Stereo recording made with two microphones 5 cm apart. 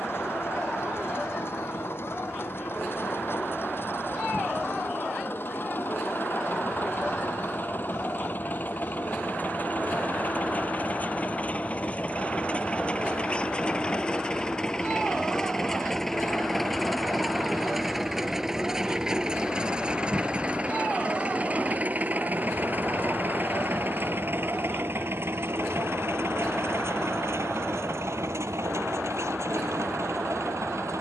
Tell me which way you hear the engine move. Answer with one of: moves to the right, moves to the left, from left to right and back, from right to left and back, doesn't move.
moves to the right.